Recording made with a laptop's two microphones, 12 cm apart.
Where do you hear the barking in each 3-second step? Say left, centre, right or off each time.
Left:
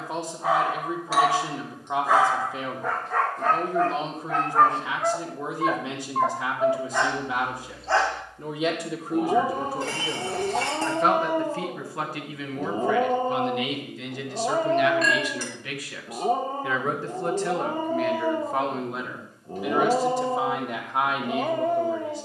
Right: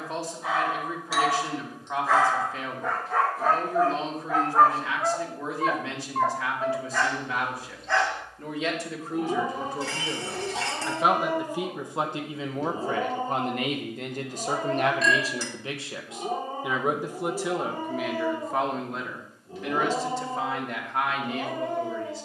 left, centre, left, left, left, left, left, left.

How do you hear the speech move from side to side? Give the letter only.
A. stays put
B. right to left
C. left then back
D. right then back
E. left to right
D.